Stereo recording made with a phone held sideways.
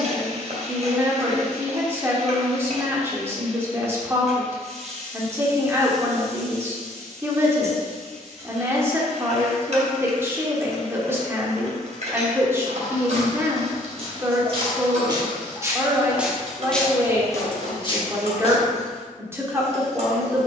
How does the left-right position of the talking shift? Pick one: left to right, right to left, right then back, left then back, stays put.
stays put.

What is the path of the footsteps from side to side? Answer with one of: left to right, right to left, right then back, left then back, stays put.
right to left.